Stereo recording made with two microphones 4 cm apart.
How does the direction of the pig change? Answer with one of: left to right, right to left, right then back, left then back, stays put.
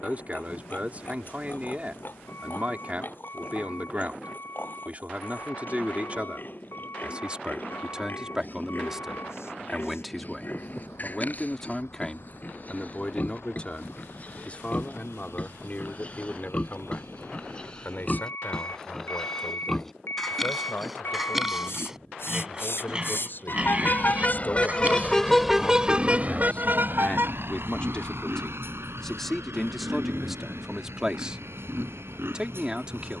left to right.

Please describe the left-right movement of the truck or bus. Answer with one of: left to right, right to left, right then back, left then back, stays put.
left to right.